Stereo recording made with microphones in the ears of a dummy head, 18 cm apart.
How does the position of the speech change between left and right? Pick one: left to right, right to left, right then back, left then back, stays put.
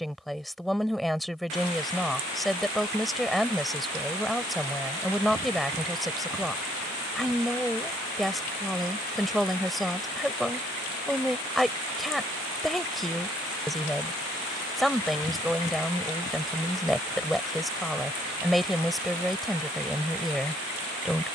stays put.